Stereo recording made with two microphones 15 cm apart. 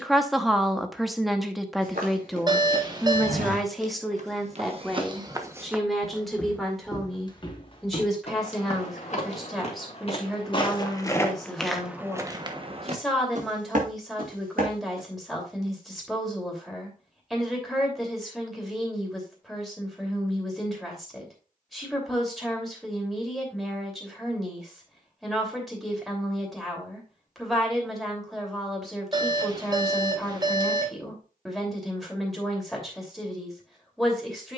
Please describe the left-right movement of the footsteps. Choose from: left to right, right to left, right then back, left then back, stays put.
left then back.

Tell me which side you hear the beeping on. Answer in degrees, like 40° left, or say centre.
30° right.